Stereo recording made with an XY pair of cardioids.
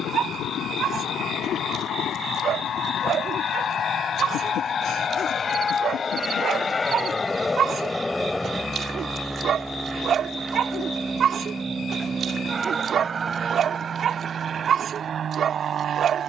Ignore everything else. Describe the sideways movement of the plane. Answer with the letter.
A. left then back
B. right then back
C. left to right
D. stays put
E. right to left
C.